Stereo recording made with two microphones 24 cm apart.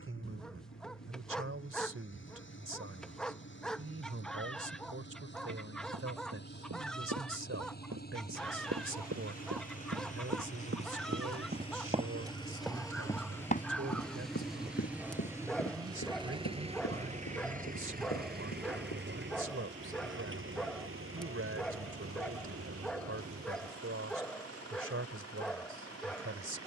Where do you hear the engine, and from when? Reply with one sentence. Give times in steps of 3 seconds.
You can hear the engine on the left from 0 s, in the centre from 12 s and on the right from 15 s.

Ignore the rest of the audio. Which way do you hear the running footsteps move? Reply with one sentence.
In this clip you hear the running footsteps go from the right side to the left.